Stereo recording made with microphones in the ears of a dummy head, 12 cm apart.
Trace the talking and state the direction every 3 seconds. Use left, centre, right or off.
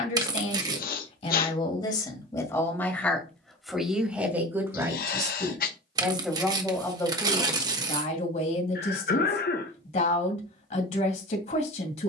left, centre, left, left.